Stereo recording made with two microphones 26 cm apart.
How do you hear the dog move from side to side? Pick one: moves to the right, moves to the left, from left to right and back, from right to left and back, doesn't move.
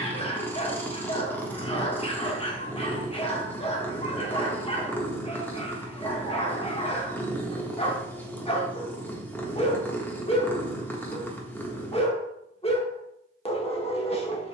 doesn't move.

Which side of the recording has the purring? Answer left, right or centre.
centre.